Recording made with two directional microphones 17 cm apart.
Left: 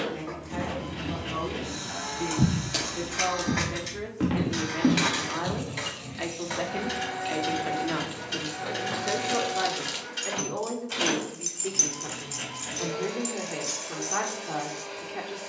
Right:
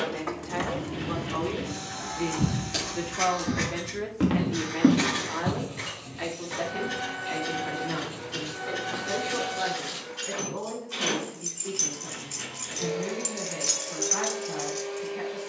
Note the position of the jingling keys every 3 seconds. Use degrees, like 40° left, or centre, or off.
40° right, 50° left, 60° left, 40° left, 30° right.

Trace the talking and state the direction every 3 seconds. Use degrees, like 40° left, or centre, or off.
30° right, 10° right, 30° left, 50° left, 50° left.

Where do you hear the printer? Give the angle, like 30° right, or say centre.
70° left.